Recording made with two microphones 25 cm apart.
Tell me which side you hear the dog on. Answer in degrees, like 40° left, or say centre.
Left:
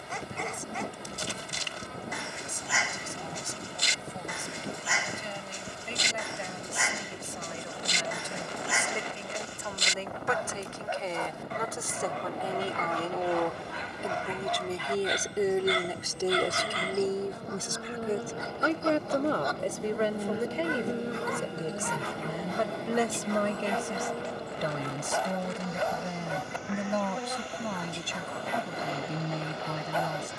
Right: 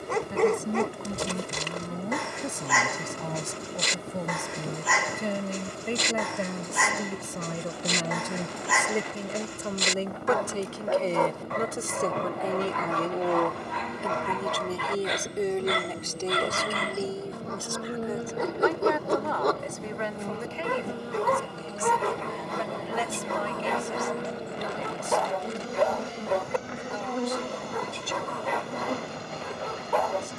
70° right.